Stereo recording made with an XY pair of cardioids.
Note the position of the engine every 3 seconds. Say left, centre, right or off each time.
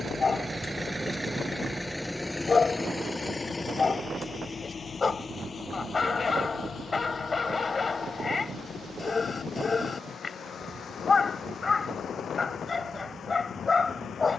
centre, left, left, left, left.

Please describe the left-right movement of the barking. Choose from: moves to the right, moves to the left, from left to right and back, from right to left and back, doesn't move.
doesn't move.